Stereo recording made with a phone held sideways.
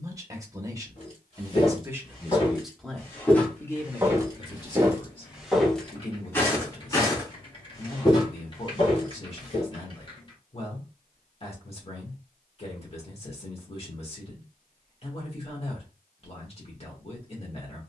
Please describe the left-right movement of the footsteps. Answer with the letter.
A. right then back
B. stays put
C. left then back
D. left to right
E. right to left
A.